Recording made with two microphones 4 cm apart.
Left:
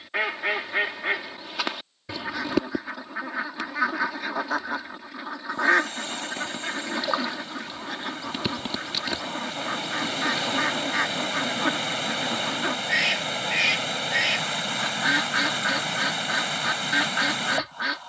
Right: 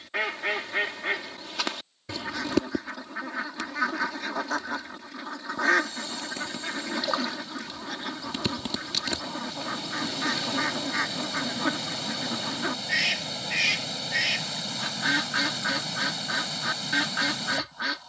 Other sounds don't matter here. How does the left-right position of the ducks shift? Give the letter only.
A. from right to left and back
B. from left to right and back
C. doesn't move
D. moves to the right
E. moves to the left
C.